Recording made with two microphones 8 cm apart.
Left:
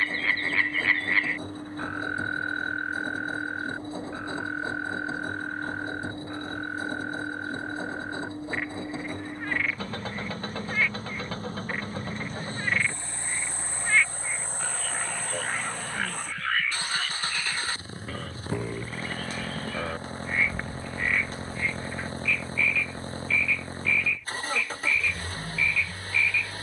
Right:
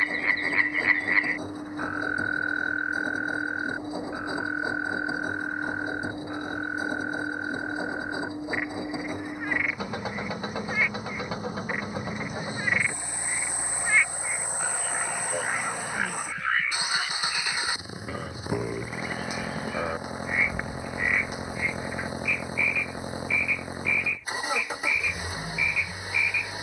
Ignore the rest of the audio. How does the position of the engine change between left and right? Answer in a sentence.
You can hear the engine stay put.